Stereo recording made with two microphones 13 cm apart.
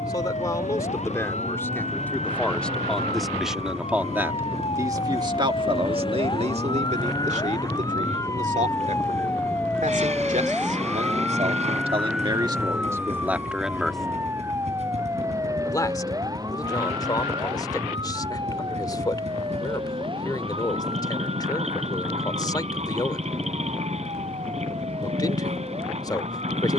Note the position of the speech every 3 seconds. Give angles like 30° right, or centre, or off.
20° left, 20° right, 70° right, 70° right, 20° right, 30° left, 30° left, 30° left, 30° left.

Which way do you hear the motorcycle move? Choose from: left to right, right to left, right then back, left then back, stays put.
stays put.